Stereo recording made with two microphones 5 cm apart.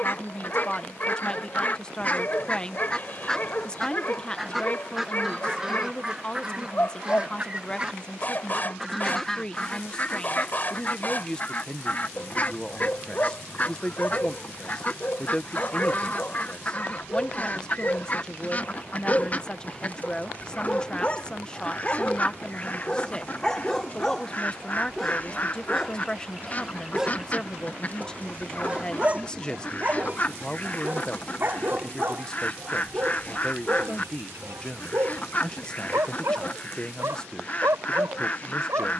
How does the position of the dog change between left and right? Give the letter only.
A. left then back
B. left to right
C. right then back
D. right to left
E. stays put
B.